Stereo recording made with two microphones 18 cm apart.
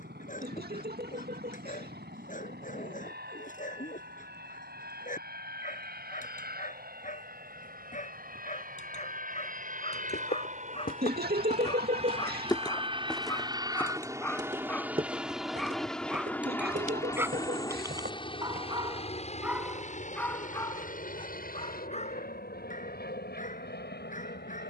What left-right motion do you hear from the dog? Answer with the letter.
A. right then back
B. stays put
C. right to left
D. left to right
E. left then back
A.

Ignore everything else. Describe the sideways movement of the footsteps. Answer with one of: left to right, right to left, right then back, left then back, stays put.
left to right.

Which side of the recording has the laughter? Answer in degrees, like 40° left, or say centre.
60° right.